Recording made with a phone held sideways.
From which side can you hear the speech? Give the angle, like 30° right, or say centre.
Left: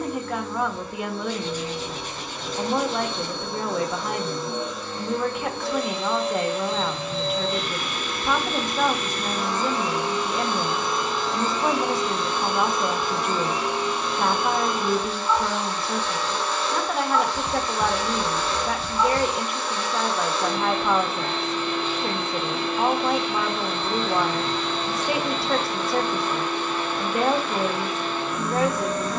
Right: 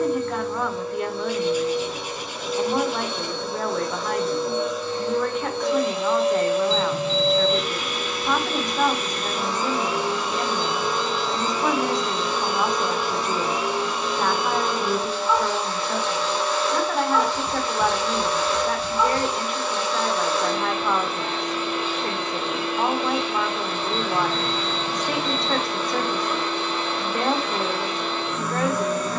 centre.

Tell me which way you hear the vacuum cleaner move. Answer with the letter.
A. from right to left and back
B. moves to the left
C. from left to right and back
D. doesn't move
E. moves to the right
D.